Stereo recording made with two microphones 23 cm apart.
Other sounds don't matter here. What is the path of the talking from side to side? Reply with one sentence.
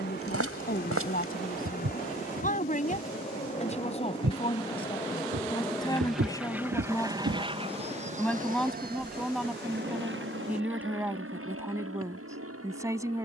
In this clip you hear the talking move from left to right.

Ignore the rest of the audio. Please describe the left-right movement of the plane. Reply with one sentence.
You can hear the plane move to the right.